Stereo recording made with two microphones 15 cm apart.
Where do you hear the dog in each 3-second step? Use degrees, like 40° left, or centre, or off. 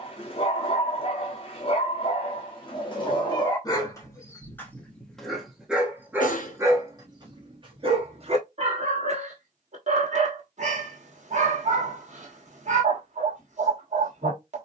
40° left, 10° left, 30° right, 50° right, 50° right.